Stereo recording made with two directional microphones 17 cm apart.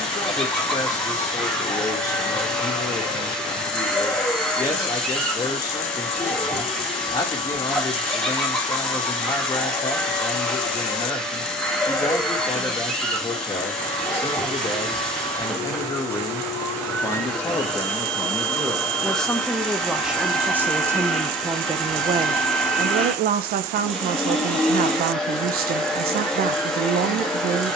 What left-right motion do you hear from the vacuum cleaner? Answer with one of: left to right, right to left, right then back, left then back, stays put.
stays put.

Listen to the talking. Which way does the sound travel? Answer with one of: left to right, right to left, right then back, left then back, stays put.
left to right.